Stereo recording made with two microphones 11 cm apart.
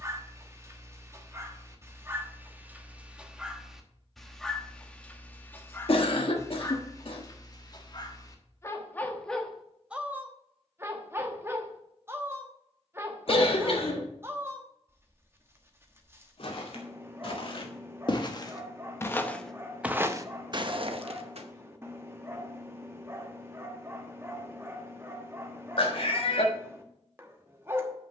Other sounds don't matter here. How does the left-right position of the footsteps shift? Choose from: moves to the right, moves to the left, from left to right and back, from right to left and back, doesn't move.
moves to the right.